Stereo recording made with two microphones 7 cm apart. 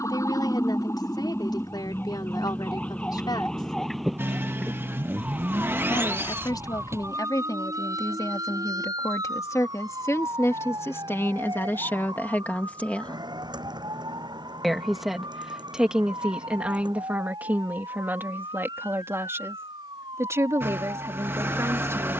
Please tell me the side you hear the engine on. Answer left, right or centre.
right.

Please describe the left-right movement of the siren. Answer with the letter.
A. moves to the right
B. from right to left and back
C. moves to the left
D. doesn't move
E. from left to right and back
A.